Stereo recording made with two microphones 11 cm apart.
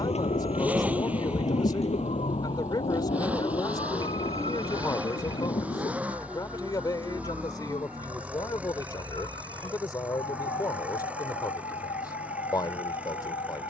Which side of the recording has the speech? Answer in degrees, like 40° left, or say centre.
40° left.